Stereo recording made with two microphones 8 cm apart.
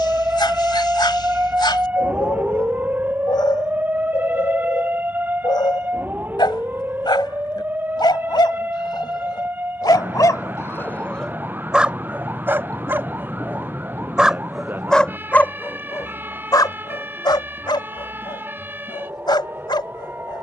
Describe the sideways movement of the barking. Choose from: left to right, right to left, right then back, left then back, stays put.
right then back.